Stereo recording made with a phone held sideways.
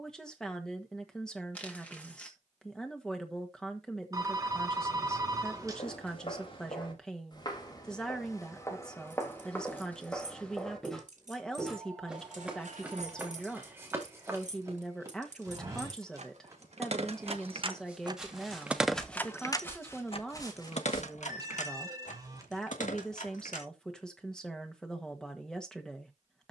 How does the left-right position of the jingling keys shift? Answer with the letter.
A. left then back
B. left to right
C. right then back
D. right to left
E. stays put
D.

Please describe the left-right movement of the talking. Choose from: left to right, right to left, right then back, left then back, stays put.
stays put.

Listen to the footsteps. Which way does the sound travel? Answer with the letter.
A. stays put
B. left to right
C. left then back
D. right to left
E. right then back
E.